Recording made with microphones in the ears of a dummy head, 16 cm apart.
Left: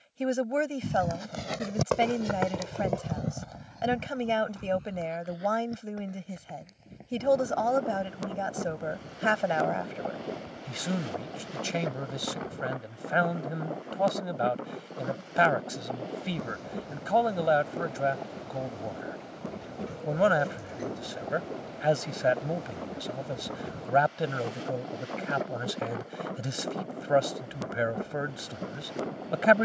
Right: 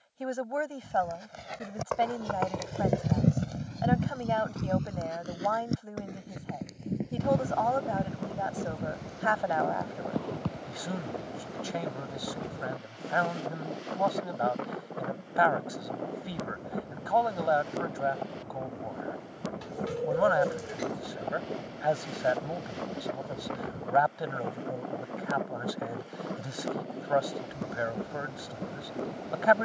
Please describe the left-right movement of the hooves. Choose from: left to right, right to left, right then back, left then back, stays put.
left to right.